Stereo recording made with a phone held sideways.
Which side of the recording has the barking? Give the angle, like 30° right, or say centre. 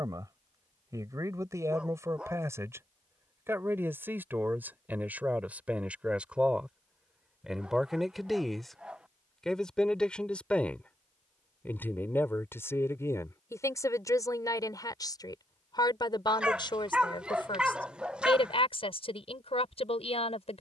10° right.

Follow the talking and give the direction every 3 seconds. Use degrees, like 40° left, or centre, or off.
20° right, 10° right, centre, 10° left, 20° left, 30° left, 50° left.